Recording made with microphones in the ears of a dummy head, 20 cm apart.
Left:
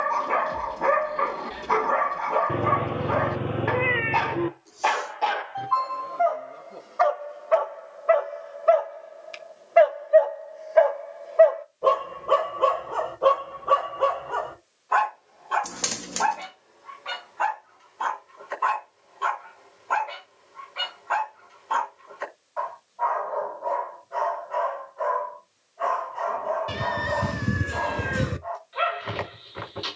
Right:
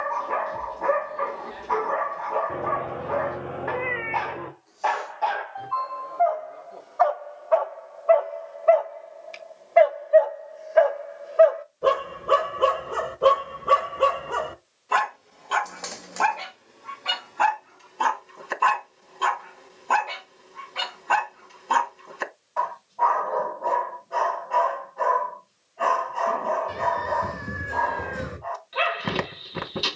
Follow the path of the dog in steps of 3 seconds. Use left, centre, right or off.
left, left, left, centre, right, right, right, right, right, right.